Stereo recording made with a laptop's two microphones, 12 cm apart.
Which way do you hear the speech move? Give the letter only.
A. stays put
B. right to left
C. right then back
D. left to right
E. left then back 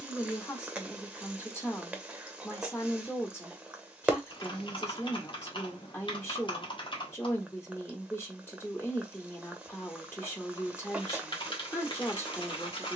A.